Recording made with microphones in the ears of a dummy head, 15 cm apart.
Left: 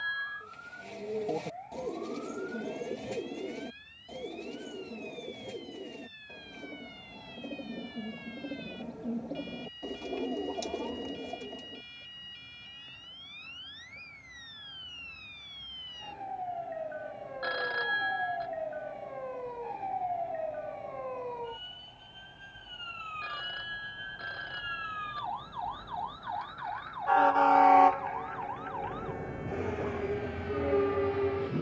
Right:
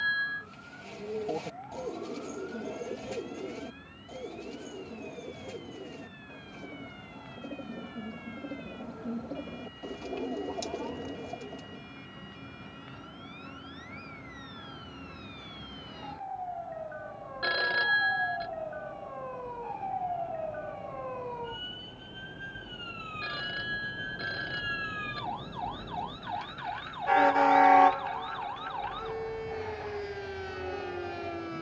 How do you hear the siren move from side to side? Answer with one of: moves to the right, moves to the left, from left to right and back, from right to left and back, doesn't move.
moves to the right.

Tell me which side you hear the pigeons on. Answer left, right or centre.
centre.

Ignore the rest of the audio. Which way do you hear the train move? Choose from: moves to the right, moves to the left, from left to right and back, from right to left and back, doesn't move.
moves to the left.